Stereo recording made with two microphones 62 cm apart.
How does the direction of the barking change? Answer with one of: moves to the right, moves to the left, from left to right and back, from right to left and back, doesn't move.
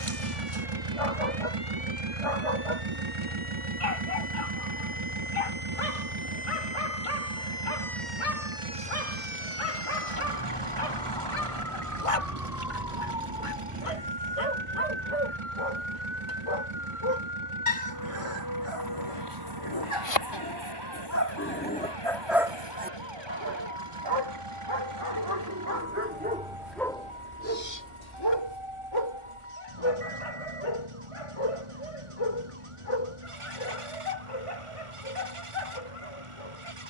from left to right and back.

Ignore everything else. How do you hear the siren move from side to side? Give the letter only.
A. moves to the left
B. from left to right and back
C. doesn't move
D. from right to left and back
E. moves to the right
E.